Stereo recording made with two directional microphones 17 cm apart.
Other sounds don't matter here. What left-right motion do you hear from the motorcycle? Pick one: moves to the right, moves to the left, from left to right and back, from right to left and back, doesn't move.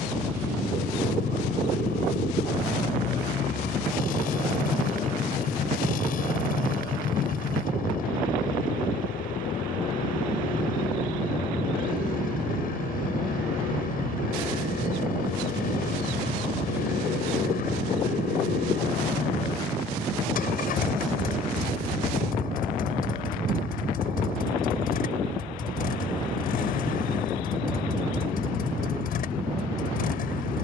doesn't move.